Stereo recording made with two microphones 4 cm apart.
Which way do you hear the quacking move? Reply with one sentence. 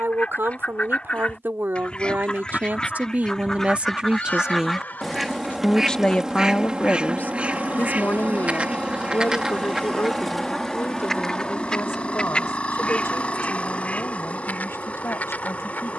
In this clip you hear the quacking go right and come back.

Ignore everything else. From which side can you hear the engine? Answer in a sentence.
In this clip you hear the engine on the left.